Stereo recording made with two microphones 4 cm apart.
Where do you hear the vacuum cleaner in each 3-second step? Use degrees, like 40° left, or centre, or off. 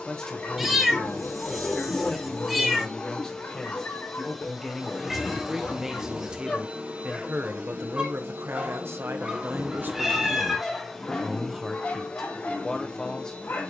20° left, centre, 40° right, 10° right, 20° left.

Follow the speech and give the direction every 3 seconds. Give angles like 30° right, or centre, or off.
20° left, centre, 50° right, 30° right, 10° left.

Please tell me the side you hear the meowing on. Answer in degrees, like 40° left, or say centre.
10° right.